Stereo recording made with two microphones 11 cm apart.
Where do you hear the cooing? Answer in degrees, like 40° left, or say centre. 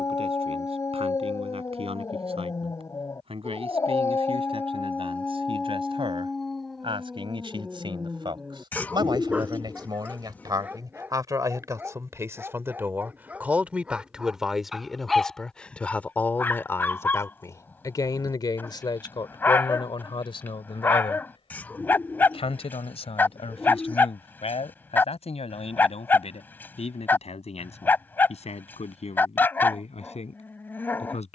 20° left.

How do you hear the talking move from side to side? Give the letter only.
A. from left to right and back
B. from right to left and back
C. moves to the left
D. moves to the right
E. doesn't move
C.